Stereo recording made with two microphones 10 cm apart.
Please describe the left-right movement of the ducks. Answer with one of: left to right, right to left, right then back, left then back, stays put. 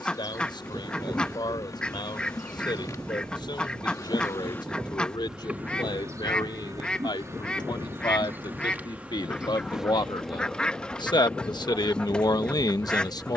stays put.